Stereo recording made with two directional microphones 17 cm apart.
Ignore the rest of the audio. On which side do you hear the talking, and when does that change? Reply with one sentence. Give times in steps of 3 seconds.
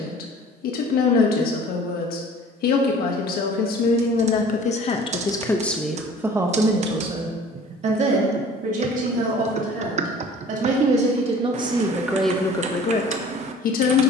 In this clip you hear the talking on the left from 0 s, on the right from 6 s and on the left from 12 s.